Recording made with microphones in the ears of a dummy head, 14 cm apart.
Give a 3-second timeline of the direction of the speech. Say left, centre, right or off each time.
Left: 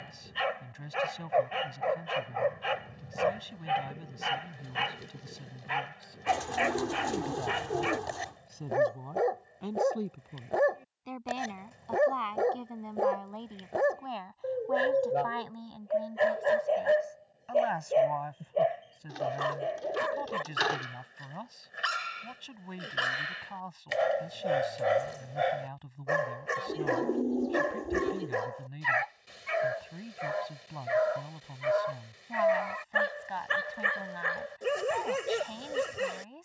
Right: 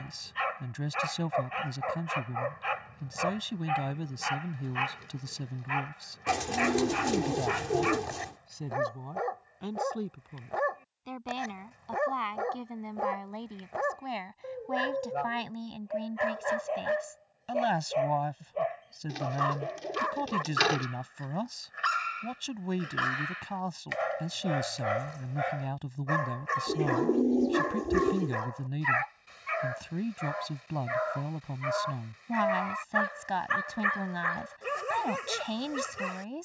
right, right, right, centre, centre, right, right, right, right, right, right, right.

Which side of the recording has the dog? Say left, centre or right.
left.